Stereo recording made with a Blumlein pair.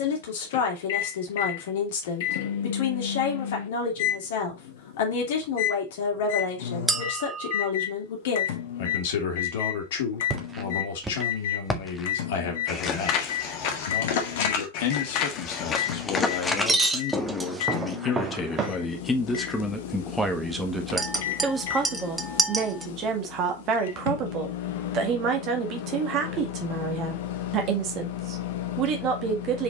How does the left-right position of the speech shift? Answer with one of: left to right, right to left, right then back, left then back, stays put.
left to right.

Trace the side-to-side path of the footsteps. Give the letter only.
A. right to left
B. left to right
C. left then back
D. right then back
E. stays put
C.